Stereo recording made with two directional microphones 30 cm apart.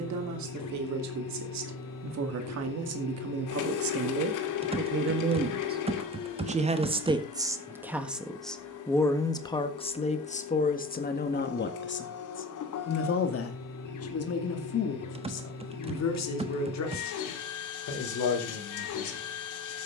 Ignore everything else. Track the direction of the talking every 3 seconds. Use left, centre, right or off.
right, right, centre, left, left, left, left.